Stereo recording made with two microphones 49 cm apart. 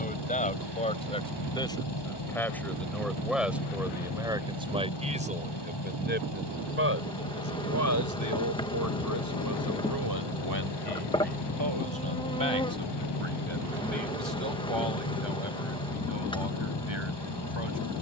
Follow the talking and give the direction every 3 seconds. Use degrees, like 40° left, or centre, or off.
10° left, 10° right, 30° right, 50° right, 60° right, 70° right.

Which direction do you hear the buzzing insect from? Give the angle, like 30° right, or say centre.
10° left.